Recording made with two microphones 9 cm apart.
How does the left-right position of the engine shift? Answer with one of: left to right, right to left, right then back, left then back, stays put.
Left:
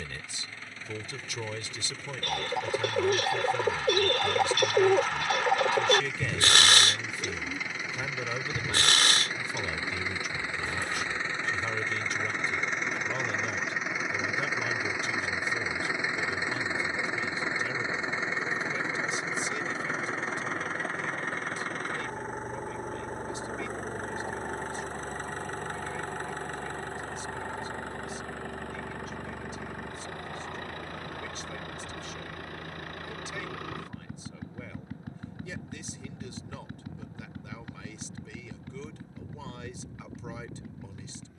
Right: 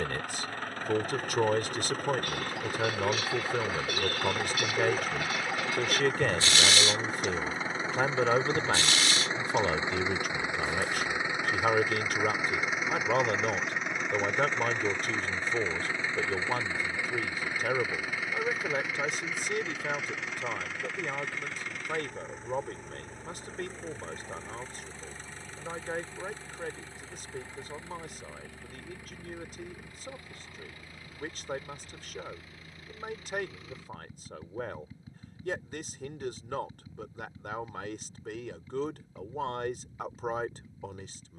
right to left.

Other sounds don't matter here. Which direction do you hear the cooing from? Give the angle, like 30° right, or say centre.
60° left.